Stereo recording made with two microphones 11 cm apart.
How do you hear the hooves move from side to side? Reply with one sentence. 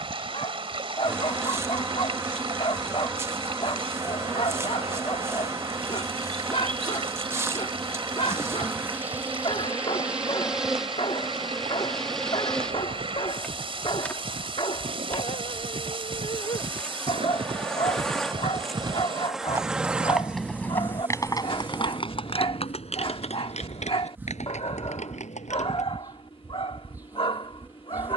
You can hear the hooves move from right to left.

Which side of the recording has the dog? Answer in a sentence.
You can hear the dog on the left.